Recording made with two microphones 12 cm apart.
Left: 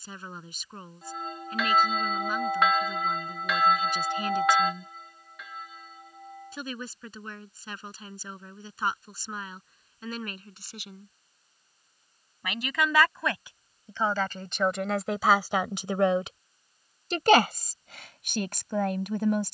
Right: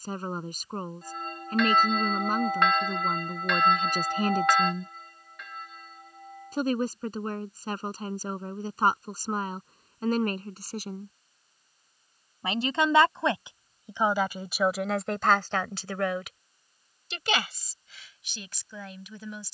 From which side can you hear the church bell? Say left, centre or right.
centre.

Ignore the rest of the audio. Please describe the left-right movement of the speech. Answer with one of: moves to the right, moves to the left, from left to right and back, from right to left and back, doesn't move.
moves to the left.